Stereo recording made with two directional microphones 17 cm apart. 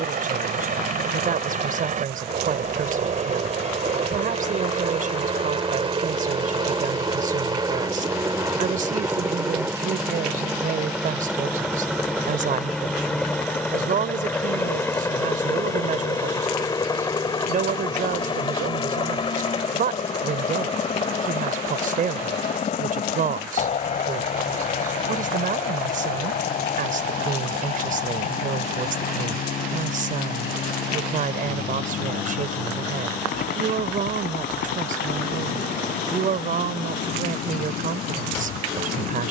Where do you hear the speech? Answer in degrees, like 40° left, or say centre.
50° right.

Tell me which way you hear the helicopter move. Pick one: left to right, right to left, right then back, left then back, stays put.
right to left.